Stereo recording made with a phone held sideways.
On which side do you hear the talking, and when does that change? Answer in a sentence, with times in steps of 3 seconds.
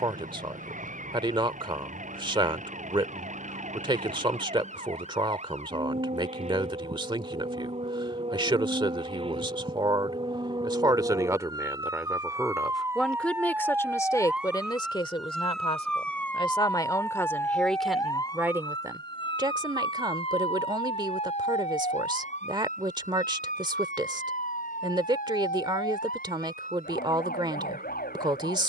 In this clip you hear the talking on the right from 0 s, in the centre from 12 s, on the left from 15 s and on the right from 18 s.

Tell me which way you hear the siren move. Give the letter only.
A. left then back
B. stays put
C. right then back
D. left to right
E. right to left
E.